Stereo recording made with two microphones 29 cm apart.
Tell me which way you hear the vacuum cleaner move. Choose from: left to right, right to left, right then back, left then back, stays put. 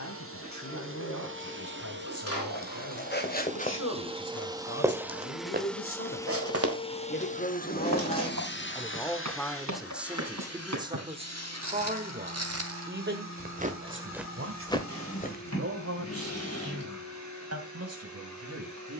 right to left.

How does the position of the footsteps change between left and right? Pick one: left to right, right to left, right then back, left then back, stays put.
right then back.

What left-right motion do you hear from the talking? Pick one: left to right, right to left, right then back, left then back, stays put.
left to right.